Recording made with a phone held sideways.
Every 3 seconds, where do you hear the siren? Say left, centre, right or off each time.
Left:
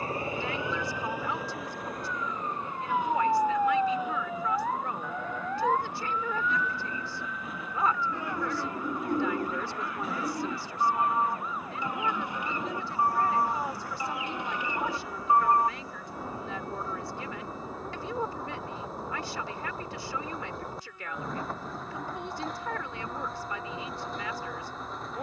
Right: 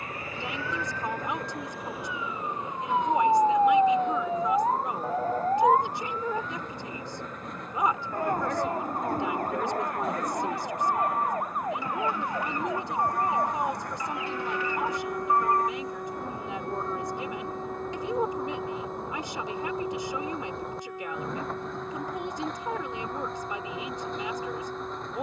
centre, right, right, right, right, right, right, right, right.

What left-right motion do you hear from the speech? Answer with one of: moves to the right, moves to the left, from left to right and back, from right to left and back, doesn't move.
doesn't move.